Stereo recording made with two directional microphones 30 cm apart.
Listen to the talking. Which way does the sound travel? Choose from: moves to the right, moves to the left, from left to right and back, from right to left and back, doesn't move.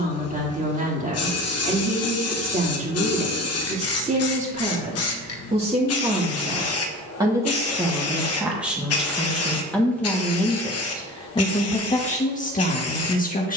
moves to the left.